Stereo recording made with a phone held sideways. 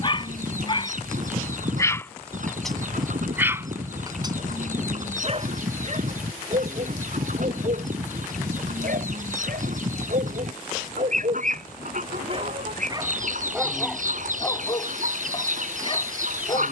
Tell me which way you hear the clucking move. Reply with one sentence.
In this clip you hear the clucking stay in one place.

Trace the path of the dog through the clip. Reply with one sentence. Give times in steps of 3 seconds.
You can hear the dog on the left from 0 s, on the right from 3 s, in the centre from 12 s and on the left from 15 s.